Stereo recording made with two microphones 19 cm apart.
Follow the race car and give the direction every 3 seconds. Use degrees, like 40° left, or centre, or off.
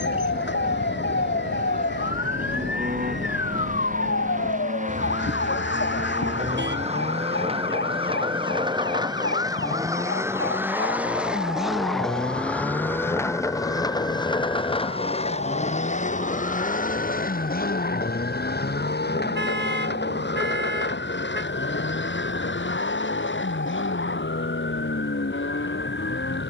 50° right, 40° right, 30° right, 10° right, 20° left, 40° left, 60° left, 70° left, 80° left.